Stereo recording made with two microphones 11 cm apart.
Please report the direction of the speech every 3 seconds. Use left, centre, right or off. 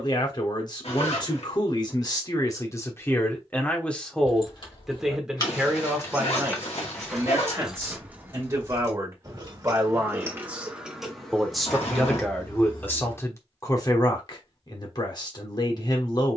left, centre, right, centre, left, left.